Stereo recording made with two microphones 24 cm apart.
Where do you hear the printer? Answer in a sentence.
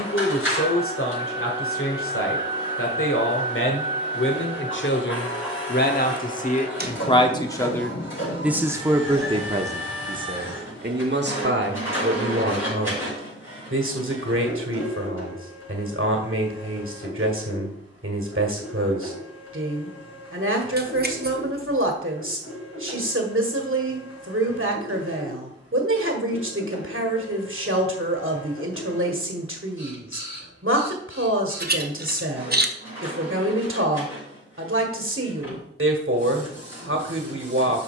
You can hear the printer on the left.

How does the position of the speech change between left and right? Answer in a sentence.
In this clip you hear the speech go from the left side to the right.